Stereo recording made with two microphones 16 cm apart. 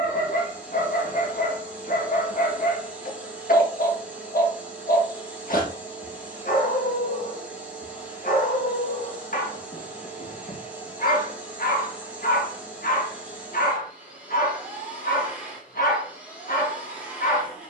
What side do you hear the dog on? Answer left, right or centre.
left.